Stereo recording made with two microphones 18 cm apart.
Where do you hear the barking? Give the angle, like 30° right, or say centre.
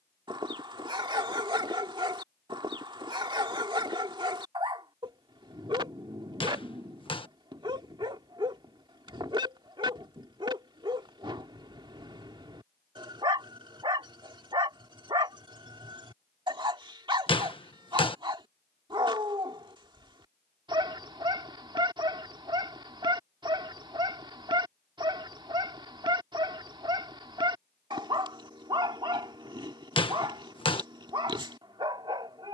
30° right.